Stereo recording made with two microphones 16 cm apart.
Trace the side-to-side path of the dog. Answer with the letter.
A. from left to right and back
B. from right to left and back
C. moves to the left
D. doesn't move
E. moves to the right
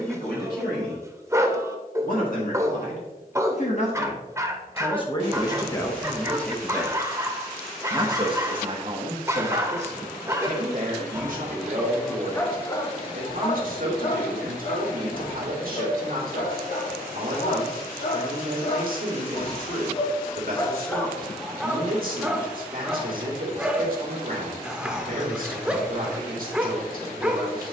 B.